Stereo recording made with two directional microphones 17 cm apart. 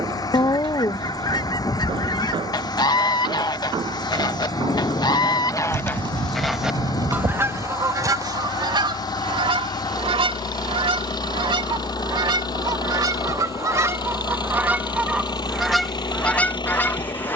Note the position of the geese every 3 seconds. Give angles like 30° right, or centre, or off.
20° left, 20° left, 20° right, 30° right, 20° right, centre.